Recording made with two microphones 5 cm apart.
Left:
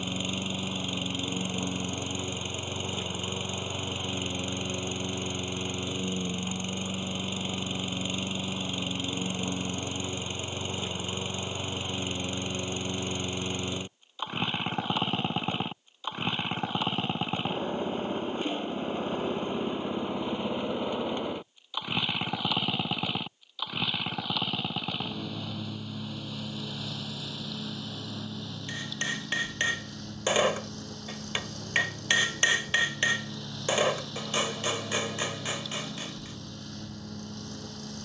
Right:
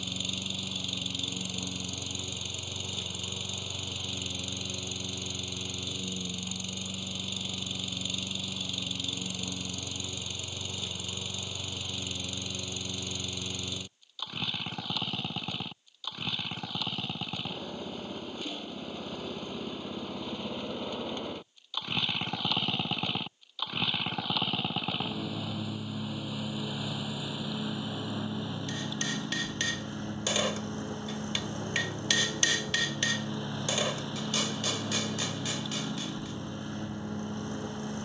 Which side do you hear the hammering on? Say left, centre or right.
left.